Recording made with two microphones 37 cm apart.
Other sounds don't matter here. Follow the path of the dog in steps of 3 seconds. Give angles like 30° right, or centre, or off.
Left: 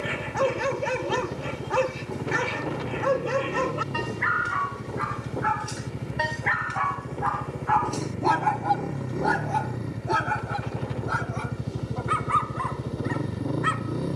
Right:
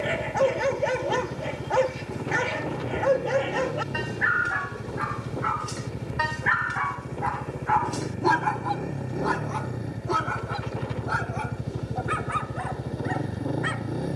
20° left, 10° left, 30° right, centre, 10° left.